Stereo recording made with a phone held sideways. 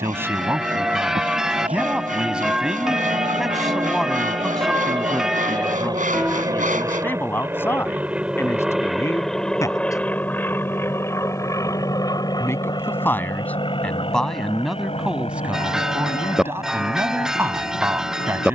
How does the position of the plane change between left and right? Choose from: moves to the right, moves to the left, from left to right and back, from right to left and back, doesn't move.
moves to the left.